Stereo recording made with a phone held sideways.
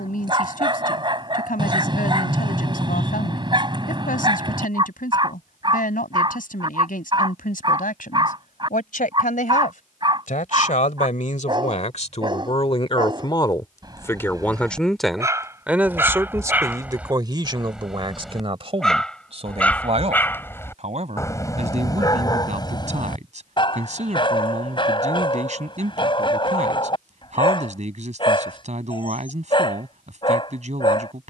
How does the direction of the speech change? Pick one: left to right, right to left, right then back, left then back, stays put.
left to right.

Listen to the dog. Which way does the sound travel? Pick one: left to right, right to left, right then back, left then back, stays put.
right to left.